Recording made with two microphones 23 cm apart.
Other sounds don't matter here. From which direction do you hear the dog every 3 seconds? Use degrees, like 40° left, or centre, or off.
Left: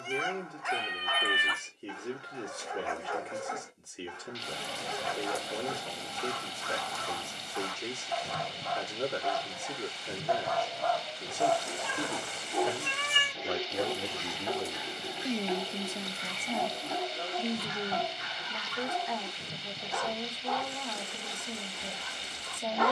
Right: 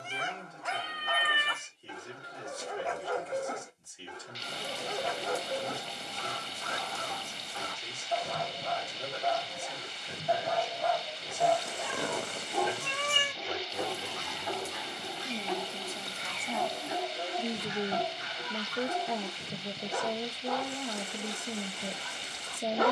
40° right, 40° right, 40° right, 20° right, 20° left, centre, 30° right, 30° right.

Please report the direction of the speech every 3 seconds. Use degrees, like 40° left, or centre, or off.
70° left, 70° left, 70° left, 70° left, 60° left, 10° left, 30° right, 30° right.